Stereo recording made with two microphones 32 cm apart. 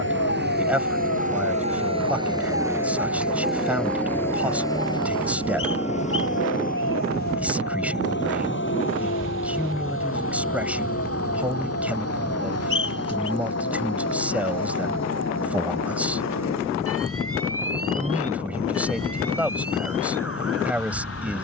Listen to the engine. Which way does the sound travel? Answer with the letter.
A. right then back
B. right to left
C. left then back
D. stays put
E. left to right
B.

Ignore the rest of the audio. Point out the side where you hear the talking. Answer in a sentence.
You can hear the talking in the centre.